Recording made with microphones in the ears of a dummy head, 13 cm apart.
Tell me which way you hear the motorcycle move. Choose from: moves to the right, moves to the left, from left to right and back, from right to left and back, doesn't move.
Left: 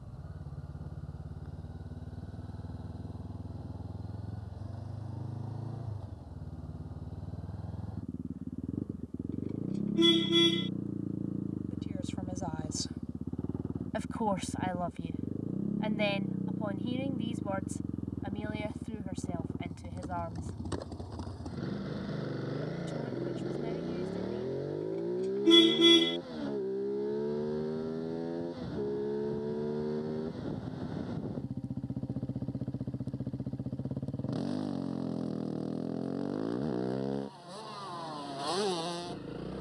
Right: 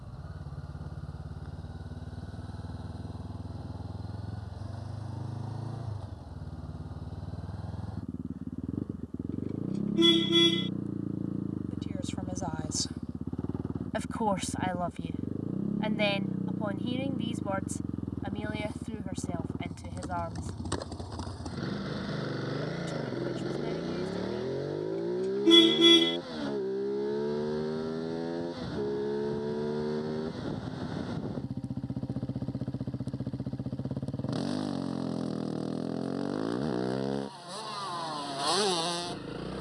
doesn't move.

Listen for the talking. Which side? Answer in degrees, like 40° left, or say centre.
20° right.